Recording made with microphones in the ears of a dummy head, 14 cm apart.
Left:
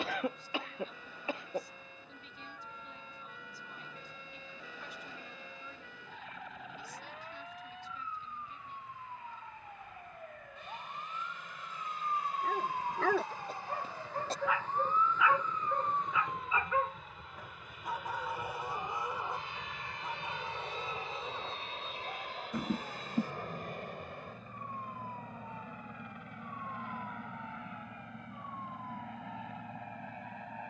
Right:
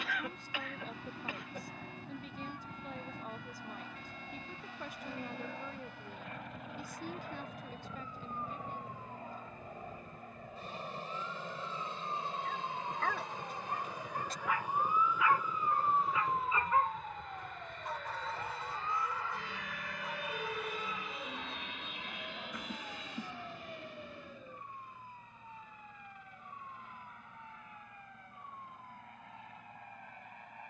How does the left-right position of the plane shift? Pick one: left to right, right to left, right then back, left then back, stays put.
right to left.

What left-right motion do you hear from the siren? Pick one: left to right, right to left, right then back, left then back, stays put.
left to right.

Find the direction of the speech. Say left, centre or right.
right.